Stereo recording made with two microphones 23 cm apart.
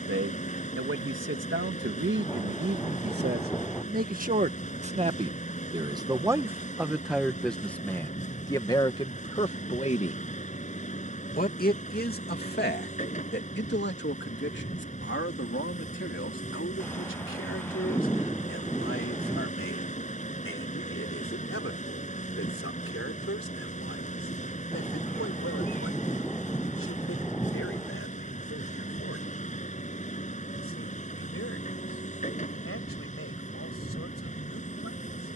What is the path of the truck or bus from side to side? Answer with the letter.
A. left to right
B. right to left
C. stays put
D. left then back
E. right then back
C.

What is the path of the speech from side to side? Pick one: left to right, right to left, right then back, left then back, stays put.
right to left.